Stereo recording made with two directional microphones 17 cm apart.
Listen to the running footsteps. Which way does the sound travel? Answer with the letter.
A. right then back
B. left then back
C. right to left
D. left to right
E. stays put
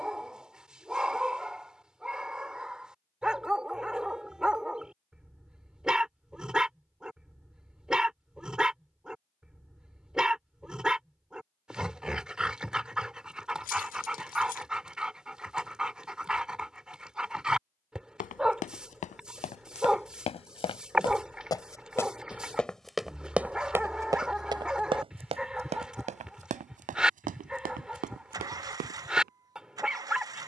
D.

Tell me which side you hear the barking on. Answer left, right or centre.
centre.